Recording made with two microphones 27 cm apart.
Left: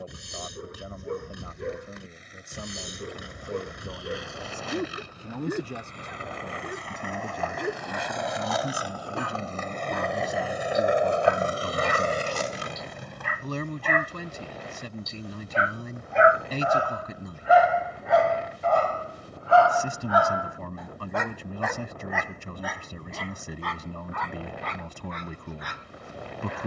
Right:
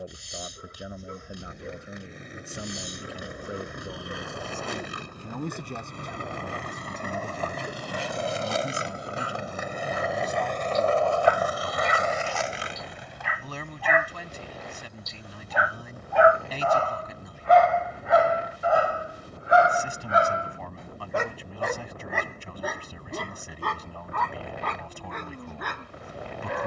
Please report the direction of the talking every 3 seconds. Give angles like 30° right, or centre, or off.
10° right, centre, 20° left, 30° left, 50° left, 50° left, 50° left, 50° left, 50° left.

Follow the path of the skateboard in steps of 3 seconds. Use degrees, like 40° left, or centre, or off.
60° right, 60° right, 40° right, 10° left, 50° left, off, off, off, off.